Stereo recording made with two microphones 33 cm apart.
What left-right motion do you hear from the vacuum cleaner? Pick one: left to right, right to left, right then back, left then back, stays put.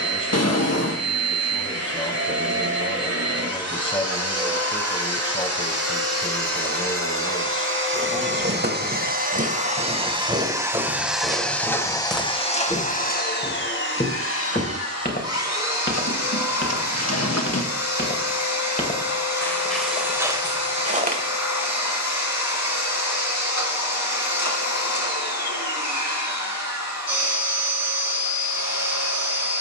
right to left.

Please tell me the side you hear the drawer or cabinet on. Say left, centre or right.
left.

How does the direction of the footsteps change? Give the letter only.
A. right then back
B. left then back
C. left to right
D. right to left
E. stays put
B.